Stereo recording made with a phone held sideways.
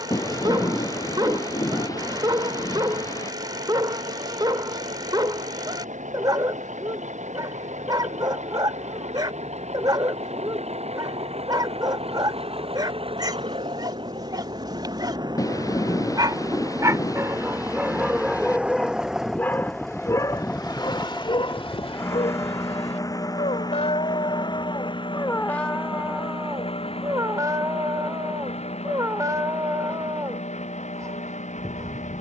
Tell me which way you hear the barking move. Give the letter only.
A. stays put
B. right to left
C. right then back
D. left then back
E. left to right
D.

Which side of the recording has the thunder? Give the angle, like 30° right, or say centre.
20° left.